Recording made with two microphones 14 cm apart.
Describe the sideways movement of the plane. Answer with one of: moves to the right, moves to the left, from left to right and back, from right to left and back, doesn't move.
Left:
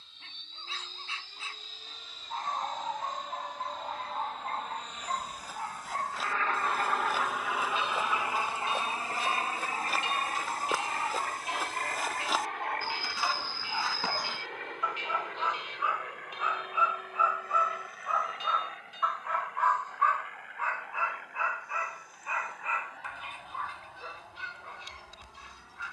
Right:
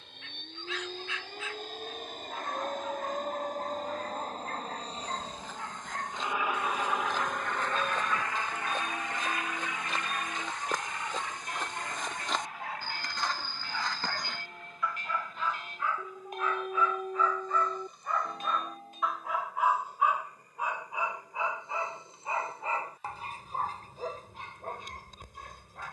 moves to the left.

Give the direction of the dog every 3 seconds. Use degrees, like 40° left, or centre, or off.
30° left, 30° left, 30° left, 30° left, 20° left, 10° left, 10° right, 30° right, 50° right.